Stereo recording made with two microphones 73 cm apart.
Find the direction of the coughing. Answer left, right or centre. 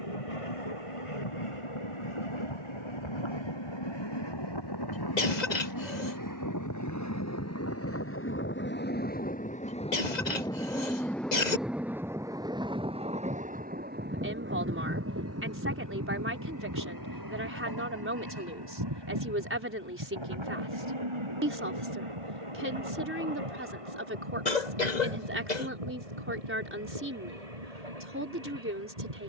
left.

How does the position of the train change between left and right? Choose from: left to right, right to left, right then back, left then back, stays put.
left to right.